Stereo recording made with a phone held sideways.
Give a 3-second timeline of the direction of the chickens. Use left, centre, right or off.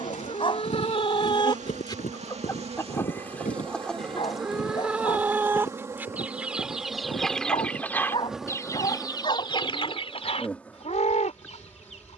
left, centre, centre, left.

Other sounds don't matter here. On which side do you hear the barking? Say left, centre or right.
left.